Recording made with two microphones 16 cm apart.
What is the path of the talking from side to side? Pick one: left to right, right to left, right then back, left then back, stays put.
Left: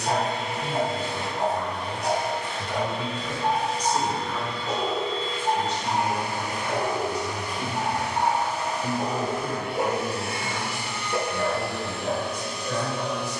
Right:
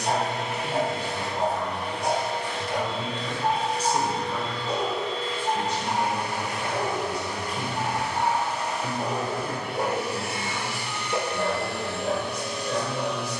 right then back.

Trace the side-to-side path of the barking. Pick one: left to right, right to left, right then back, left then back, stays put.
left then back.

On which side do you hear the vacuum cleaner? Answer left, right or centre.
right.